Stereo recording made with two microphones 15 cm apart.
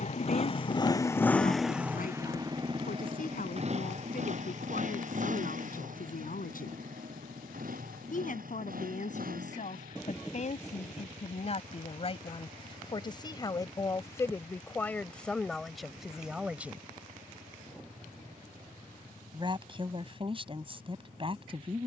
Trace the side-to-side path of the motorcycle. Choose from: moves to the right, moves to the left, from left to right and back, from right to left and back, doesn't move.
moves to the right.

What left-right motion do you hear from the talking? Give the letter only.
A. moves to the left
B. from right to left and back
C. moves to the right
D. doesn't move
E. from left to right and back
C.